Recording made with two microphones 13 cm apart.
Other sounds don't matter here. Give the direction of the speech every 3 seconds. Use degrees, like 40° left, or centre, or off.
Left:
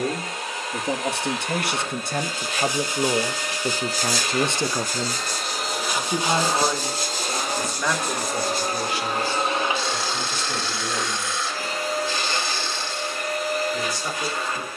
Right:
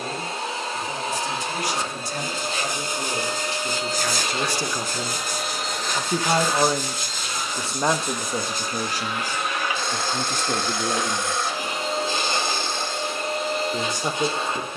70° left, 30° left, 30° right, 50° right, 60° right.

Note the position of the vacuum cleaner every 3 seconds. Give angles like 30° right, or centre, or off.
30° right, 20° right, 40° left, 10° left, 20° right.